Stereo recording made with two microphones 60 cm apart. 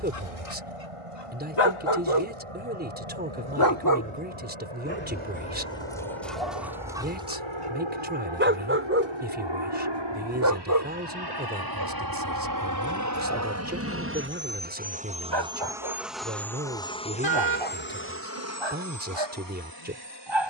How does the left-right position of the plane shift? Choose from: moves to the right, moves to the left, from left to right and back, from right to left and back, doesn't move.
moves to the left.